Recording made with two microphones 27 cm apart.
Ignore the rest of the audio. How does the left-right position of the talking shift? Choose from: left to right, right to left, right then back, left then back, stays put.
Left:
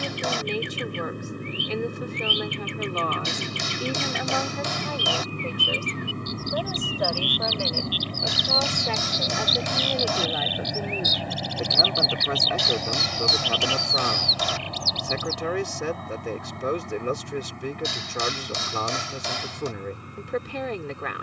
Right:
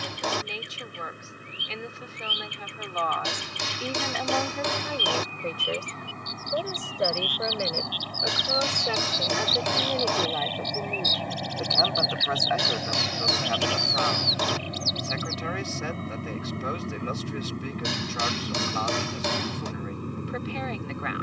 right then back.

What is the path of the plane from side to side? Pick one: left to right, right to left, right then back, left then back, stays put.
left to right.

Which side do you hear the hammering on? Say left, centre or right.
right.